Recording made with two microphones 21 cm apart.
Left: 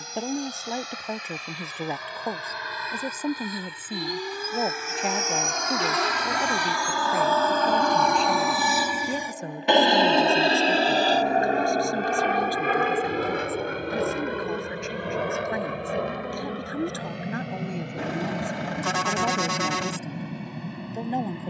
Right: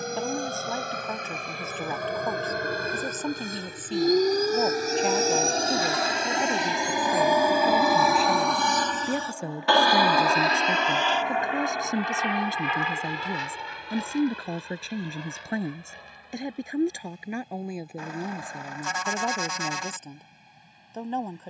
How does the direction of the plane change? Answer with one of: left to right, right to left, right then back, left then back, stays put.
right to left.